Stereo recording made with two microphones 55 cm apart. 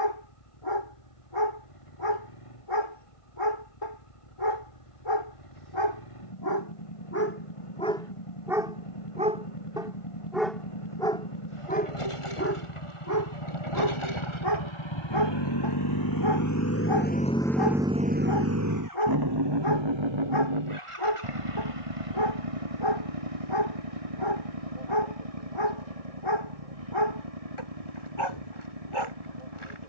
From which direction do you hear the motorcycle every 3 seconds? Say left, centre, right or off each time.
left, left, left, left, left, left, right, right, right, right.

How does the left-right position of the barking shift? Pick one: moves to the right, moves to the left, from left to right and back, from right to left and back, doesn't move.
from left to right and back.